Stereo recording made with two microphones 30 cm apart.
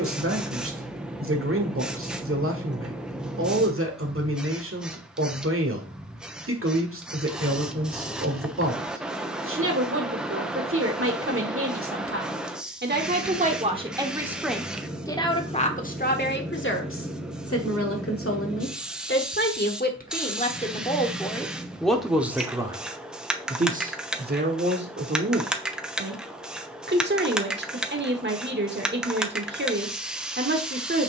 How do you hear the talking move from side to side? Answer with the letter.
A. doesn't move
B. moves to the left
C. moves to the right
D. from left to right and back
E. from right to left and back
E.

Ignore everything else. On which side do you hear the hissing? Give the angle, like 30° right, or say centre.
centre.